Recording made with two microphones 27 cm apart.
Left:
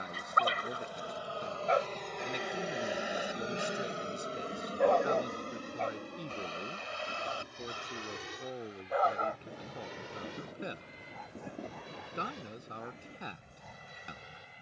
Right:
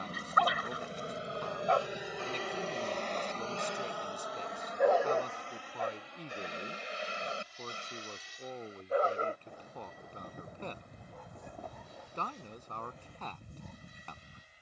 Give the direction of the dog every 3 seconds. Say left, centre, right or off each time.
left, centre, right, right, right.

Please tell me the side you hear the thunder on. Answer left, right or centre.
left.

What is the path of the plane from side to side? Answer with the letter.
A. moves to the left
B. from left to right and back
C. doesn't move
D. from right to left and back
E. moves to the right
A.